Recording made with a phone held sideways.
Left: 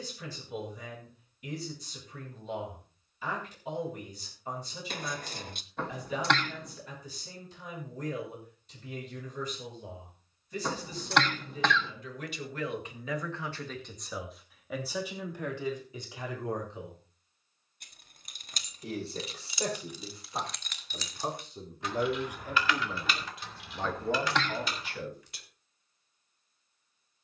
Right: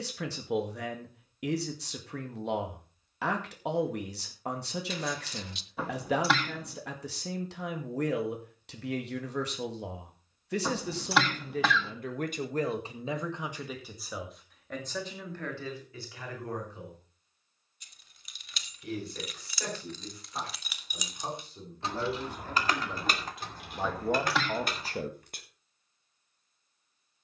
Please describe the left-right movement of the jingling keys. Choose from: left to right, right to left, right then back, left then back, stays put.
left to right.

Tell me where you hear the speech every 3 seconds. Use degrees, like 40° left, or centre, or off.
80° right, 80° right, 80° right, 70° right, 20° right, 20° left, 30° left, 10° left, 30° right.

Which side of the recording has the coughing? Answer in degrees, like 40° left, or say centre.
centre.